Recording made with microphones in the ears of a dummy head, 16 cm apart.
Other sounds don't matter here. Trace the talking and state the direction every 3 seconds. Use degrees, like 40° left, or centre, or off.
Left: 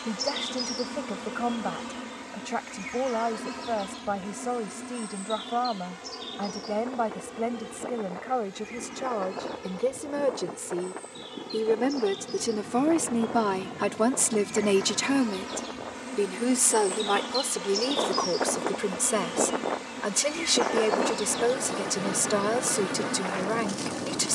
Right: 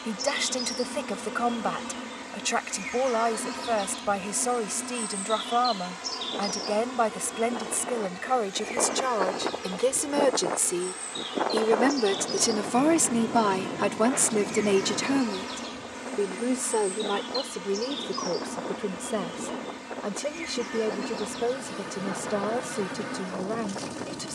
70° right, 70° right, 70° right, 60° right, 10° right, 40° left, 50° left, 60° left.